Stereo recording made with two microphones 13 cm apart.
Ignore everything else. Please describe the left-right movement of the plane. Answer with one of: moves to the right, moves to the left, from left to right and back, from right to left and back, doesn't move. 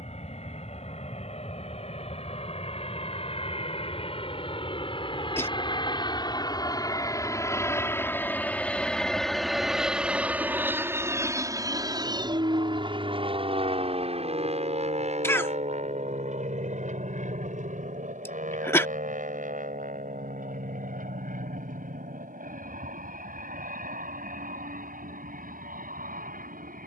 moves to the right.